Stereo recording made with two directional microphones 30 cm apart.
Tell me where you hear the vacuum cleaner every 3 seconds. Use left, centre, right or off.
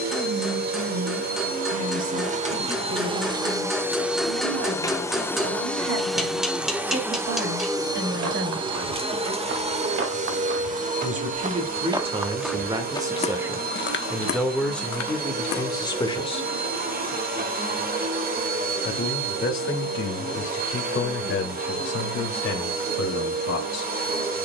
right, centre, centre, right, right, right, right, right.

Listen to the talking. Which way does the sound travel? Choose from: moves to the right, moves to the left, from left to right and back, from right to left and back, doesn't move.
moves to the left.